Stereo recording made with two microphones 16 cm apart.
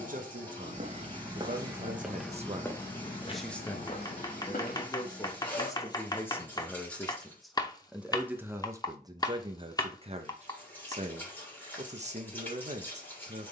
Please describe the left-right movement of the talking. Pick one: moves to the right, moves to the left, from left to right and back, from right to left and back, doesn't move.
from right to left and back.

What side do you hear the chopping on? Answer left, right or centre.
left.